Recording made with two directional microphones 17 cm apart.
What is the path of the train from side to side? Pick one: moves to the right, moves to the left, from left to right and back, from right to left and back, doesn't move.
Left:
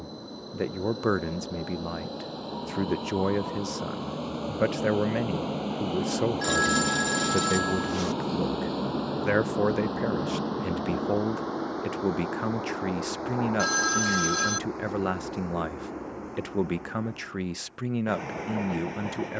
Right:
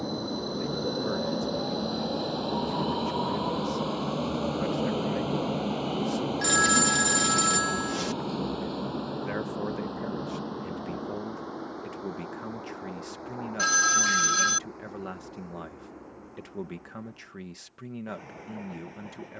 moves to the left.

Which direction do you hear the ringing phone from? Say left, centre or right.
centre.